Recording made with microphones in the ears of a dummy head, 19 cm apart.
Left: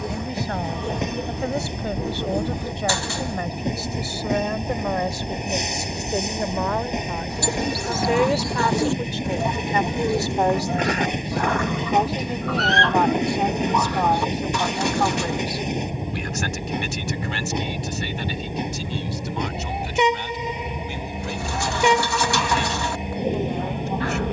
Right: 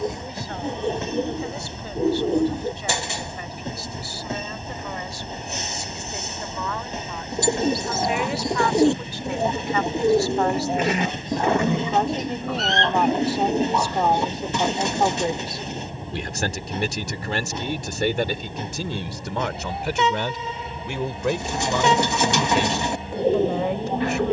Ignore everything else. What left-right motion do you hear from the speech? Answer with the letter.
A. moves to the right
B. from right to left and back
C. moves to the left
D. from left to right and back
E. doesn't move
A.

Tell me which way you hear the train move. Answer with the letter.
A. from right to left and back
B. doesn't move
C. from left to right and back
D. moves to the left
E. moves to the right
B.